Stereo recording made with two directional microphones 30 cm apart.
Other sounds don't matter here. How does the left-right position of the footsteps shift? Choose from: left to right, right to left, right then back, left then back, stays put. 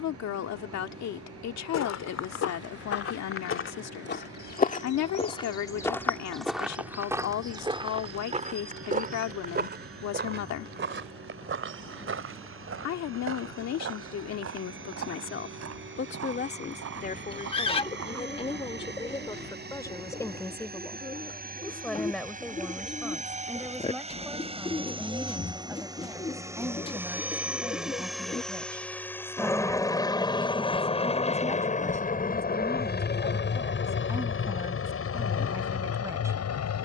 left to right.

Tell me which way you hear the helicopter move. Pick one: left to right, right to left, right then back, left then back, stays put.
right to left.